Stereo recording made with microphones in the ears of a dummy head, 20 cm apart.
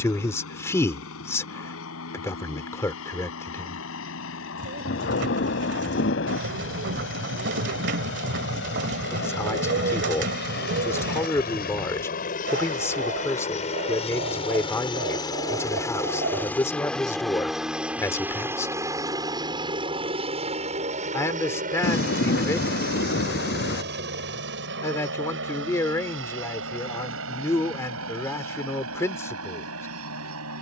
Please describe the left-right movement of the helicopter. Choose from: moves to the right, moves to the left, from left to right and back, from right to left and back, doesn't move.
moves to the right.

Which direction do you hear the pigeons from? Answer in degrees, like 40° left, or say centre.
50° right.